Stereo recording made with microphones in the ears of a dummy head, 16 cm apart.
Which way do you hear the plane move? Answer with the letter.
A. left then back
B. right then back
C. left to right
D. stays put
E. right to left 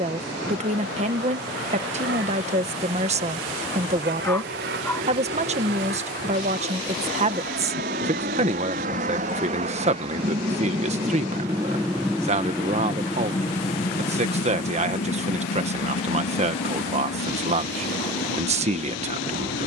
E.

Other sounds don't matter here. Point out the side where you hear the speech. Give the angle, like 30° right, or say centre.
40° right.